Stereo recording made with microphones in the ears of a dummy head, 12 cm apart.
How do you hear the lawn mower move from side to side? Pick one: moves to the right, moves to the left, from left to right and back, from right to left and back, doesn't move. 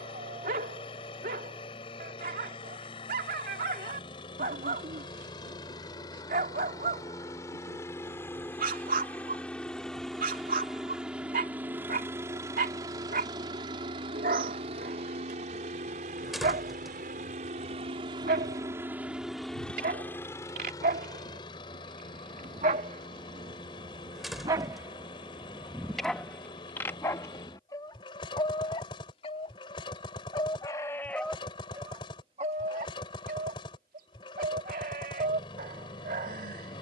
from left to right and back.